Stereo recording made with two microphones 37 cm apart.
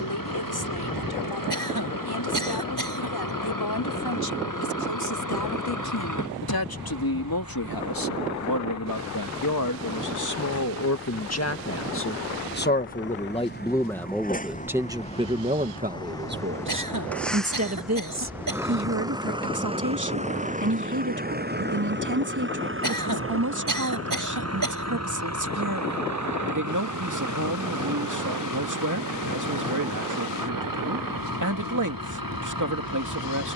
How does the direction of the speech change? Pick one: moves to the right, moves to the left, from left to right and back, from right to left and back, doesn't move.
moves to the right.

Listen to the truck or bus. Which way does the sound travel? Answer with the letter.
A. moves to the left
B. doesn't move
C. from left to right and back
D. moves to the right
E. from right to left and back
D.